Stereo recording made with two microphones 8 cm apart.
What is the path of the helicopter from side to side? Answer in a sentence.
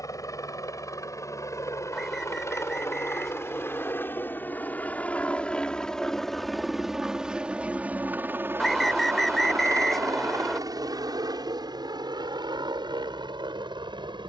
You can hear the helicopter go from the left side to the right.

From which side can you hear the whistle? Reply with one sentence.
In this clip you hear the whistle in the centre.